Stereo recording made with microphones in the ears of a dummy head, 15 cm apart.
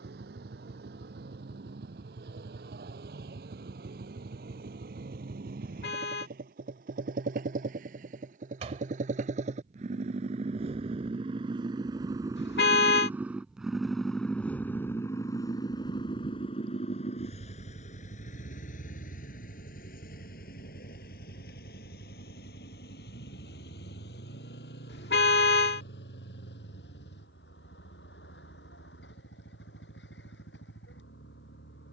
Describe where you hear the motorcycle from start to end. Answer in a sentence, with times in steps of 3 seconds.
You can hear the motorcycle on the right from 0 s, in the centre from 12 s and on the left from 15 s.